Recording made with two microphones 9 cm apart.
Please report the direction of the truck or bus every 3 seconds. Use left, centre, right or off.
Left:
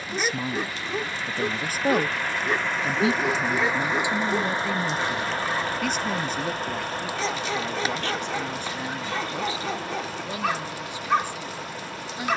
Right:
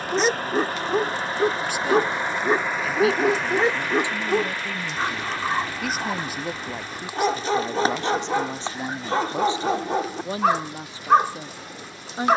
right, left, left, left.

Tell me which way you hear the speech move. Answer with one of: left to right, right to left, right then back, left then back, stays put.
left to right.